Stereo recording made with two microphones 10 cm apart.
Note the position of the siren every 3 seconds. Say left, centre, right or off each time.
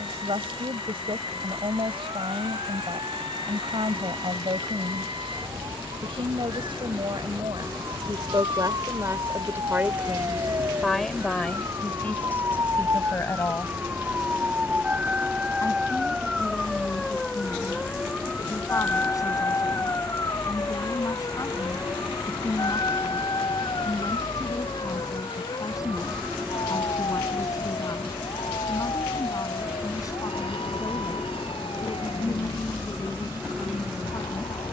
right, right, right, right, right, centre, left, left, left, left, left, left.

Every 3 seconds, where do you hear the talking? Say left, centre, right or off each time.
right, right, right, centre, left, left, left, left, left, left, left, left.